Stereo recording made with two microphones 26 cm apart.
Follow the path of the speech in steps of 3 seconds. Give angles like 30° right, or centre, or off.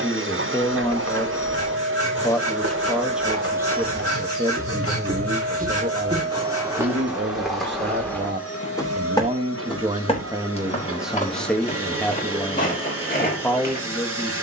10° left, 20° right, 40° right, 10° right, 10° left.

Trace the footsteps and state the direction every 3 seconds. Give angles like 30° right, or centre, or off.
70° right, 50° right, centre, 30° left, 30° left.